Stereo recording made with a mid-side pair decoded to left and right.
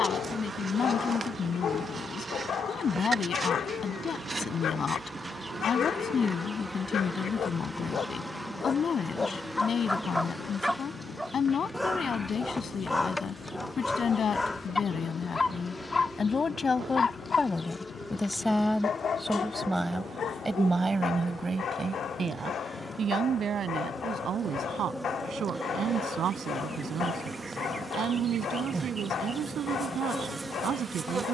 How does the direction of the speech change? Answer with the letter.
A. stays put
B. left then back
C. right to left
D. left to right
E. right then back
D.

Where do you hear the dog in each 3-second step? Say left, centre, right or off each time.
left, left, left, centre, centre, left, left, left, left, left, left.